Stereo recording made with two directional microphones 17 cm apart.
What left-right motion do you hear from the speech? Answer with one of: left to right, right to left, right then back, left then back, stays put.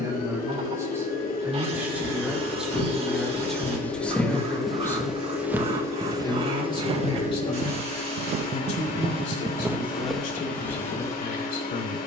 right to left.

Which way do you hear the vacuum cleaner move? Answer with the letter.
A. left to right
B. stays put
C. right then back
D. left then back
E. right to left
B.